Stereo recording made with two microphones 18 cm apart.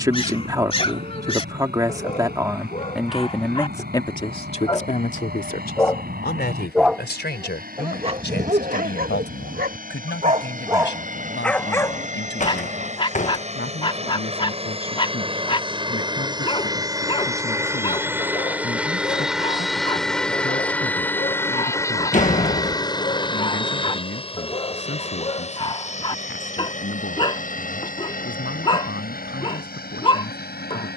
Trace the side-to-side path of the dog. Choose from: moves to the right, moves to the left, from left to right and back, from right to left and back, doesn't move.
from left to right and back.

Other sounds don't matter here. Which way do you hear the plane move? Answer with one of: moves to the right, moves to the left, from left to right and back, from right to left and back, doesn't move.
moves to the left.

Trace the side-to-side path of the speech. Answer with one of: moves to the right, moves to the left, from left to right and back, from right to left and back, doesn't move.
moves to the left.